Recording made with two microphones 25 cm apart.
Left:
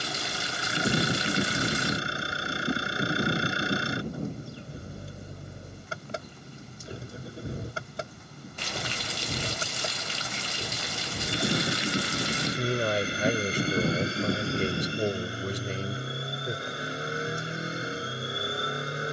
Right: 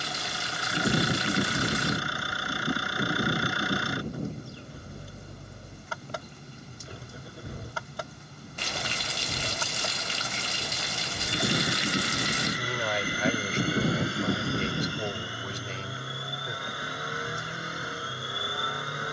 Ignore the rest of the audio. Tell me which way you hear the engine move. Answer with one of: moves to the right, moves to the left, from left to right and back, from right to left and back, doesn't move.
doesn't move.